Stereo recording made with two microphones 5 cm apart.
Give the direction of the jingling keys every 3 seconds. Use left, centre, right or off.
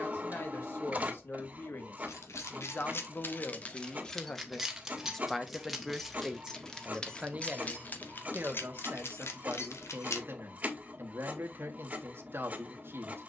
left, centre, left, left, off.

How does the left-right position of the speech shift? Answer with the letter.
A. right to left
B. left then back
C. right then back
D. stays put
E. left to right
E.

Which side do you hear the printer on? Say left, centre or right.
right.